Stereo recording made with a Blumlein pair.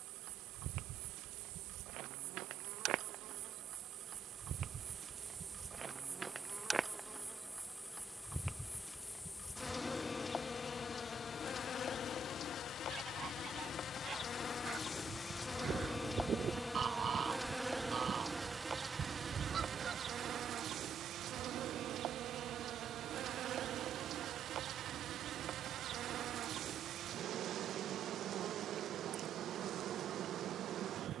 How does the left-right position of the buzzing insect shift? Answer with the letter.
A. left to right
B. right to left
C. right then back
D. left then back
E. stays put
D.